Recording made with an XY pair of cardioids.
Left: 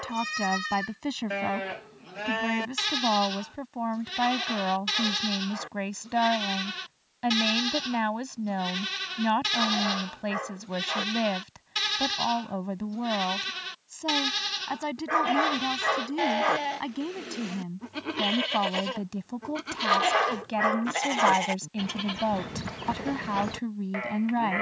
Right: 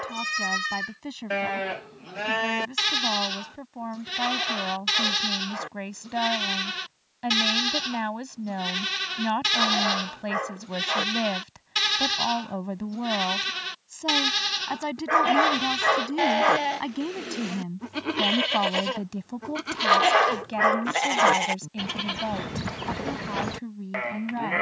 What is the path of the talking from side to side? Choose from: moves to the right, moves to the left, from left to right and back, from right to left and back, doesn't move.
from left to right and back.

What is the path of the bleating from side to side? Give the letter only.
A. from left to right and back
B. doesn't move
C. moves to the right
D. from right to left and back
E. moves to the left
B.